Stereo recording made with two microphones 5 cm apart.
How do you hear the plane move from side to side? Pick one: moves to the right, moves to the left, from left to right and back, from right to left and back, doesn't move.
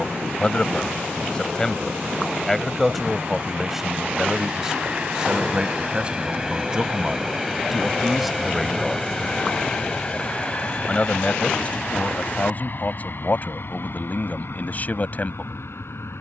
moves to the left.